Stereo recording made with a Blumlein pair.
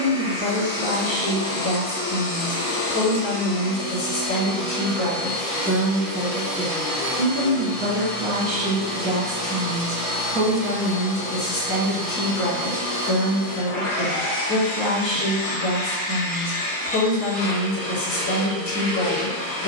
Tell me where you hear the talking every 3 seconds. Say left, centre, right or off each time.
left, left, right, centre, left, left, left.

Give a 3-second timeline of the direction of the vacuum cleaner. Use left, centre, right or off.
left, left, centre, centre, left, left, left.